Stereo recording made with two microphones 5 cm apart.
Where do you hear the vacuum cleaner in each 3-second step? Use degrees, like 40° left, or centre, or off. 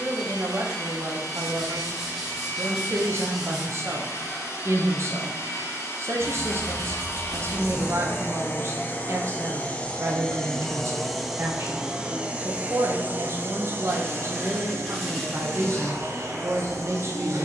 70° left, 60° left, 50° left, 10° left, 40° right, 60° right.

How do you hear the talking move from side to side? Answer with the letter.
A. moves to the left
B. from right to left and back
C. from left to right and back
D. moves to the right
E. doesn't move
E.